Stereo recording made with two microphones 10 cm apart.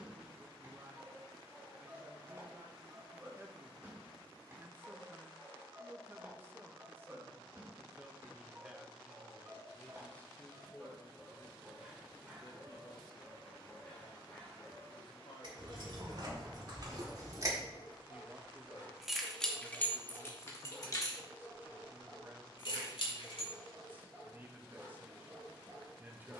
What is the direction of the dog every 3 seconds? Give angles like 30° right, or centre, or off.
20° right, 20° right, 20° right, 20° right, 10° left, 40° left, 40° left, centre, 20° right.